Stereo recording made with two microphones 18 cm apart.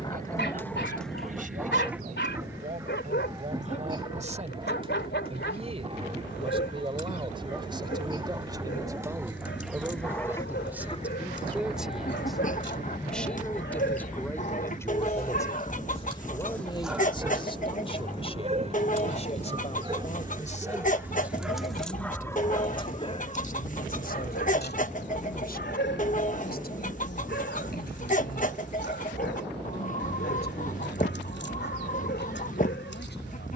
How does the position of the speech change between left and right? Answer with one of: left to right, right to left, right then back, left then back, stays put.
right to left.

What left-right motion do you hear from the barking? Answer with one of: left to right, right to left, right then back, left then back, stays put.
right then back.